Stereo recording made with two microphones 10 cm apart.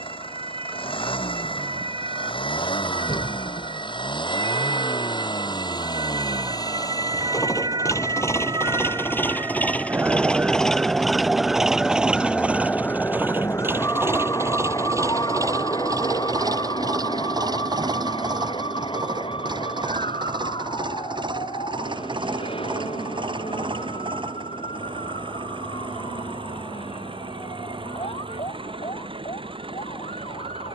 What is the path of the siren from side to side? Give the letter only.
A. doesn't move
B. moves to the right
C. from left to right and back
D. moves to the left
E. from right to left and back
D.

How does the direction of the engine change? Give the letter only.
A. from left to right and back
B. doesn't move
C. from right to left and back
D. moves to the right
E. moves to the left
D.